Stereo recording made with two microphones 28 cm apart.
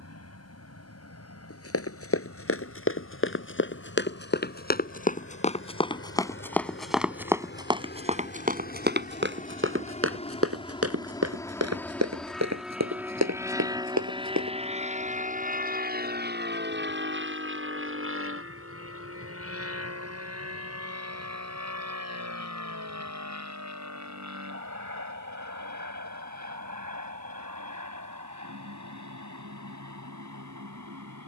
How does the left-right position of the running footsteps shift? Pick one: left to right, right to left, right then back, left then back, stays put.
left to right.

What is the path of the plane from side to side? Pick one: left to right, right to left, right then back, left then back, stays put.
left to right.